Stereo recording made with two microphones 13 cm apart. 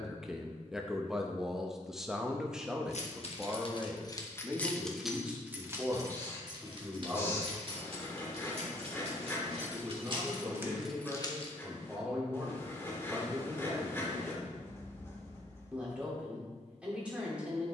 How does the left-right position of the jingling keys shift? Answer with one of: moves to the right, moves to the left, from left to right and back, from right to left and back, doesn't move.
from left to right and back.